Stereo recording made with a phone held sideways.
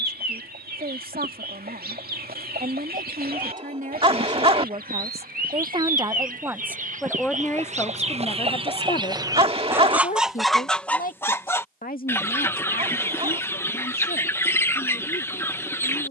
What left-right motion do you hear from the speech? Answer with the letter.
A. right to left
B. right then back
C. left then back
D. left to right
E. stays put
A.